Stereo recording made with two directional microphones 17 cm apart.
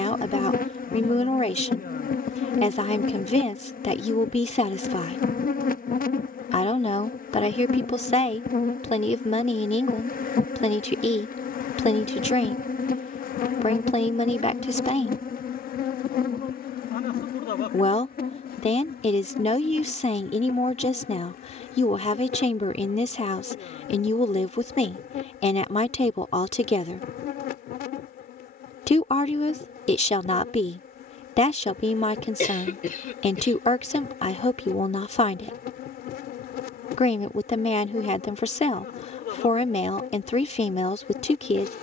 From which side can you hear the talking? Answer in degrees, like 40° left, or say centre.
40° left.